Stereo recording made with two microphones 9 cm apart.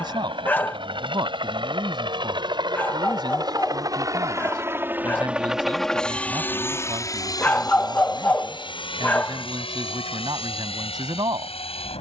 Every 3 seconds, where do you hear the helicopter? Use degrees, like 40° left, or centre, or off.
60° right, 30° right, 40° left, 70° left.